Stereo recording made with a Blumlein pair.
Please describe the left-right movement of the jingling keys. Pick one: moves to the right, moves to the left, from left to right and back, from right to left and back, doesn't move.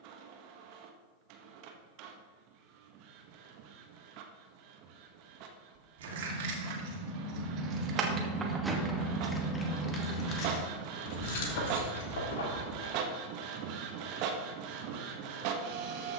moves to the left.